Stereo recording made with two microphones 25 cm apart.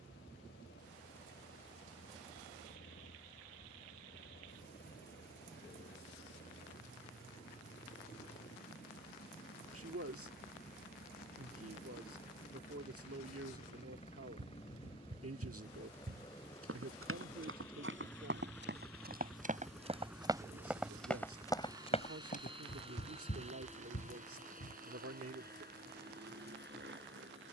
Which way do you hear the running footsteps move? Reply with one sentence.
In this clip you hear the running footsteps travel towards the left.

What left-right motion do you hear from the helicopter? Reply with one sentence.
You can hear the helicopter travel towards the right.